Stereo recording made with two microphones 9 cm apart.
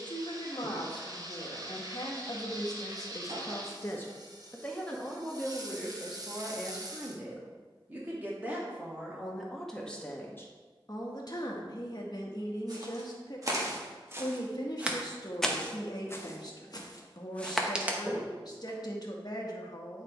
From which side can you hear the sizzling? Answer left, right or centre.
right.